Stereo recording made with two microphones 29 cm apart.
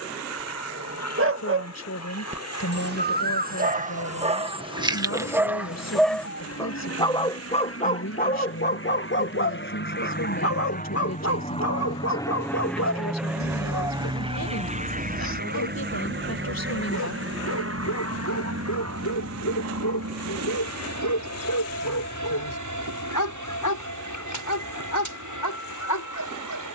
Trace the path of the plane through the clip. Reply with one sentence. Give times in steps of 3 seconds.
In this clip you hear the plane on the left from 0 s, in the centre from 12 s and on the right from 15 s.